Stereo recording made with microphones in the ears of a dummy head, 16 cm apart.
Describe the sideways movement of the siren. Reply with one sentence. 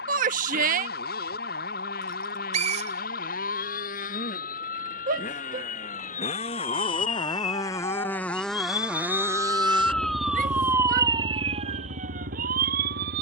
You can hear the siren travel towards the right.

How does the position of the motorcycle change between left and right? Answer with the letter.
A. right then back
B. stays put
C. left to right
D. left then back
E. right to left
C.